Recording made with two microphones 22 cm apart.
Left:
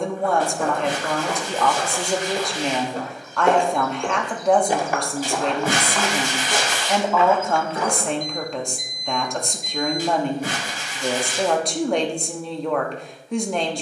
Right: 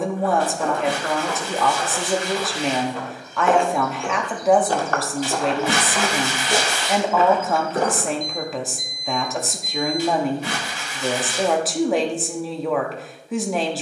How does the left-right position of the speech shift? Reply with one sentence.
You can hear the speech stay put.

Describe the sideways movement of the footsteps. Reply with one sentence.
In this clip you hear the footsteps move from left to right.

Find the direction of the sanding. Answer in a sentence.
You can hear the sanding on the left.